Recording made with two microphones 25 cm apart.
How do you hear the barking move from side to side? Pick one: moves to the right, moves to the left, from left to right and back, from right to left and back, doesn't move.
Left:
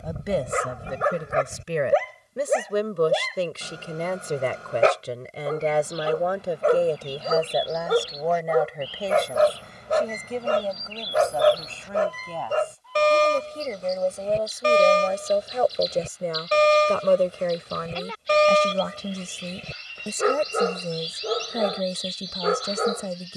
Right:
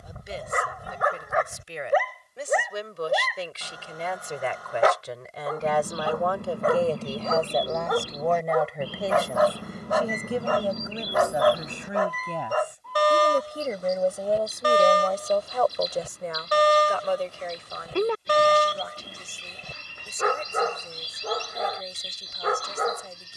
doesn't move.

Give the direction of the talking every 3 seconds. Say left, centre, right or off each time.
left, left, centre, centre, centre, left, left, left.